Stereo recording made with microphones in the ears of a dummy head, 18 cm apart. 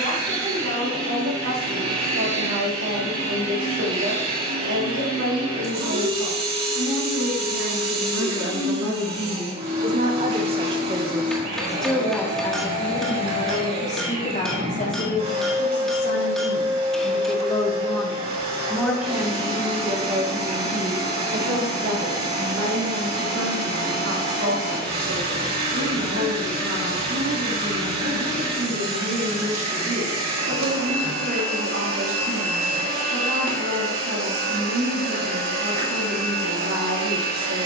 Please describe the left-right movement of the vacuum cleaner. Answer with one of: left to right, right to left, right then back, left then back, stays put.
stays put.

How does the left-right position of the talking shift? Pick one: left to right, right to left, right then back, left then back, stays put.
left then back.